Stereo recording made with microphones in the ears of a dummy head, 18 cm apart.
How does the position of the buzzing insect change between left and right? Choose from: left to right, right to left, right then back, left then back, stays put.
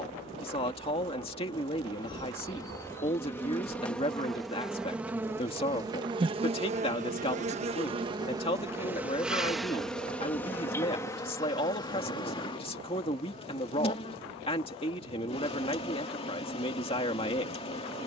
right then back.